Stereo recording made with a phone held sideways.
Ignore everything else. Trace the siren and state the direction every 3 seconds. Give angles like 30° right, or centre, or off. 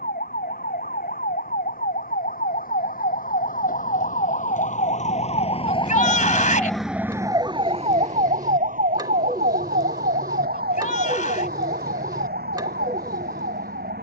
70° left, 50° left, 20° right, 70° right, 80° right.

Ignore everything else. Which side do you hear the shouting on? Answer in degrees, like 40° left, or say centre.
50° left.